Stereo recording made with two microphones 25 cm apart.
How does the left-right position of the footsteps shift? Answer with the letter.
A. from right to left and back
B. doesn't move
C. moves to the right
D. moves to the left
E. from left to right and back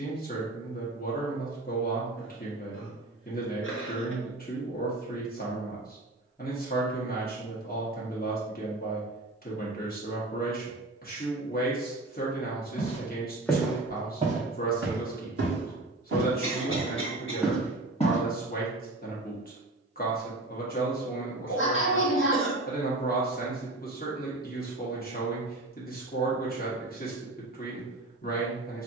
E.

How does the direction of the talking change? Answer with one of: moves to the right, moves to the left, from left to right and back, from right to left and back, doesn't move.
doesn't move.